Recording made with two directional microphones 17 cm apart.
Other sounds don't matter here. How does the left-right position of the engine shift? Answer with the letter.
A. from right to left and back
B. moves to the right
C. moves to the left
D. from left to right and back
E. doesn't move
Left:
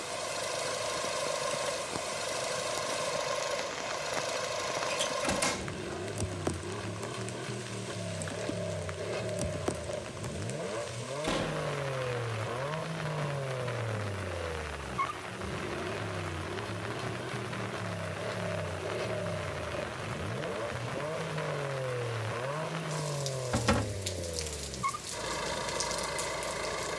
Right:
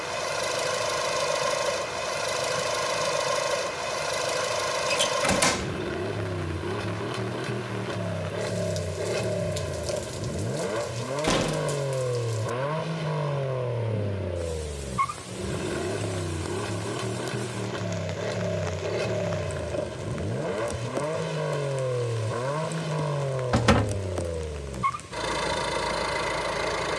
E.